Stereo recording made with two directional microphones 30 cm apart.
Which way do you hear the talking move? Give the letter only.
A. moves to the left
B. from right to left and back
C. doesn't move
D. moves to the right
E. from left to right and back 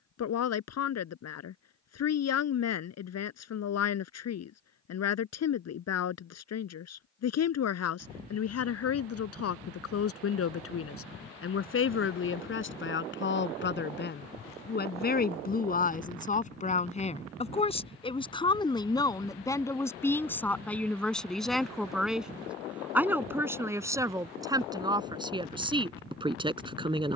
D.